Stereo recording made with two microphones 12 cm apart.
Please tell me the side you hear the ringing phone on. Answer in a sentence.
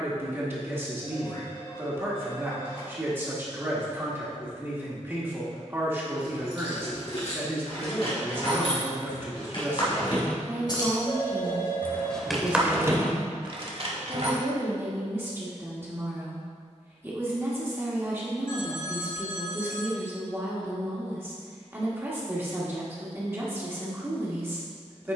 You can hear the ringing phone on the left.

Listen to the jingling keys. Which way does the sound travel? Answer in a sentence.
You can hear the jingling keys go from the left side to the right.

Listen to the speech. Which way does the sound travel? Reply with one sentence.
You can hear the speech stay put.